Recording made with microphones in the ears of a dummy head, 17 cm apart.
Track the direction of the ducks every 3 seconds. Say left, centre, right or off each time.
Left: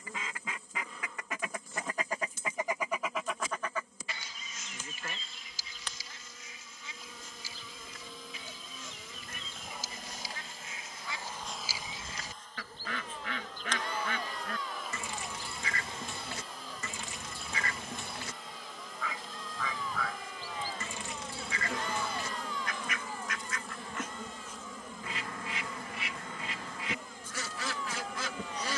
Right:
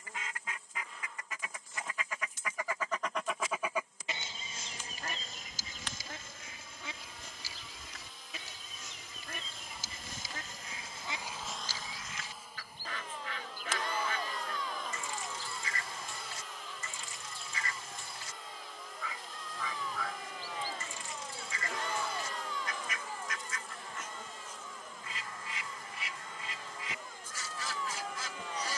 left, right, right, right, left, left, left, left, left, left.